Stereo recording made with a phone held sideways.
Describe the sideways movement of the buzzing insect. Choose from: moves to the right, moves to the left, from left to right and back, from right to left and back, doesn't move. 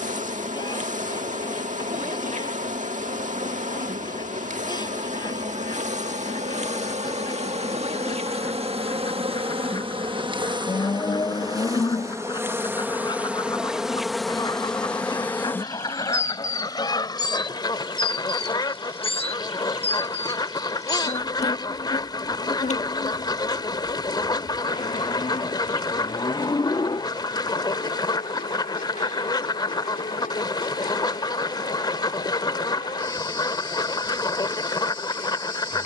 moves to the left.